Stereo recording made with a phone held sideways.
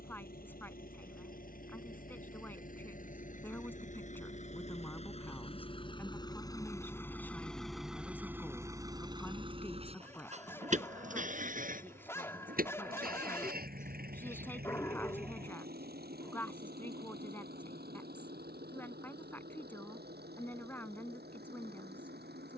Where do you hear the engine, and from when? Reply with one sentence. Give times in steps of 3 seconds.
You can hear the engine on the left from 0 s, in the centre from 6 s and on the right from 9 s.